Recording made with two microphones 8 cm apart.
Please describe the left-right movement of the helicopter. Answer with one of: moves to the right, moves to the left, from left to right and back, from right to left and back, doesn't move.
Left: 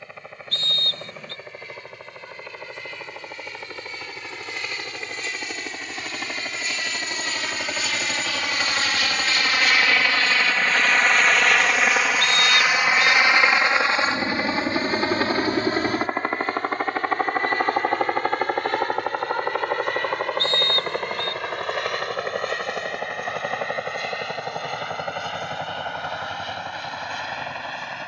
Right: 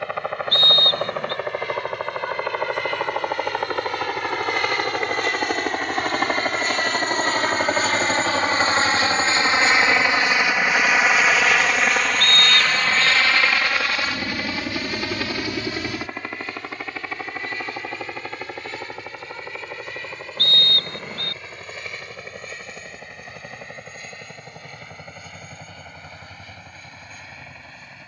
moves to the left.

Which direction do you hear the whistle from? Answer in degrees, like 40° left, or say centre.
50° right.